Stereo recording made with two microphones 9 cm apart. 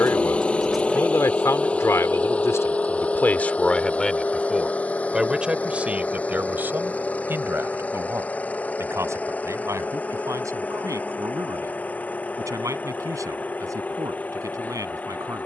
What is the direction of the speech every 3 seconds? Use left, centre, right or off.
left, centre, right, right, right.